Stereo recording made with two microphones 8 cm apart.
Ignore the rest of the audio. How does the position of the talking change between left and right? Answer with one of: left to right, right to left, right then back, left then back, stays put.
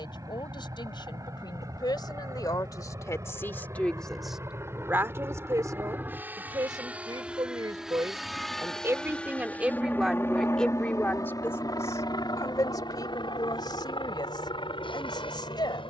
right then back.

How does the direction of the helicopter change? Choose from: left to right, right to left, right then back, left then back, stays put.
right to left.